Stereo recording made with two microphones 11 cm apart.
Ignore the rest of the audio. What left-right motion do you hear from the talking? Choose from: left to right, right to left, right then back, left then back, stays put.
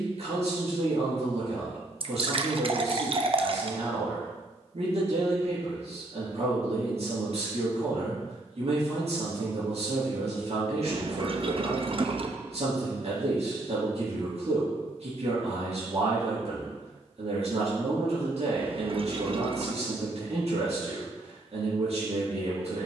stays put.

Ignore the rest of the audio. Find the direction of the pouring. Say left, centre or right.
right.